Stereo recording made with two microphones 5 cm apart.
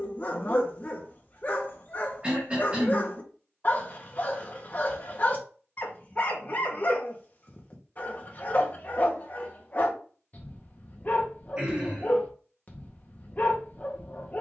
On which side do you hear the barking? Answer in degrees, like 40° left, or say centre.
40° left.